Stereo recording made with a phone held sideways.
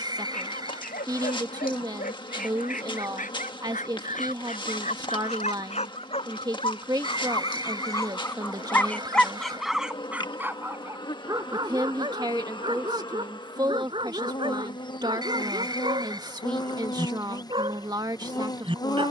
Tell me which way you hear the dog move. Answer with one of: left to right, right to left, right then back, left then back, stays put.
left to right.